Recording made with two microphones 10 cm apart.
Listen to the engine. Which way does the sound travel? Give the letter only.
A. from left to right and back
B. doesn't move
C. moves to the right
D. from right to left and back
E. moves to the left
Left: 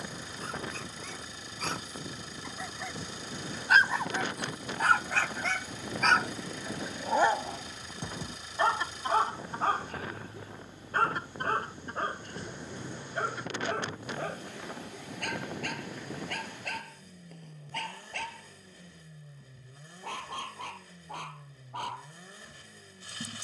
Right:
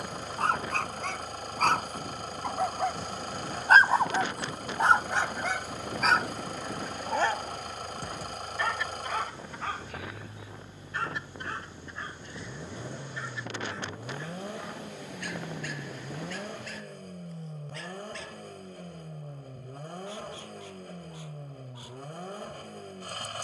B.